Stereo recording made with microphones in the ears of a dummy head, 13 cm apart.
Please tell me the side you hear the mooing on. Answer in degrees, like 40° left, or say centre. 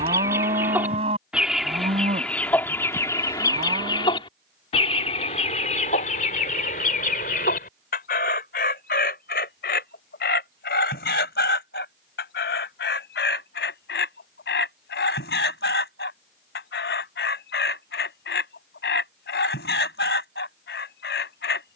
40° right.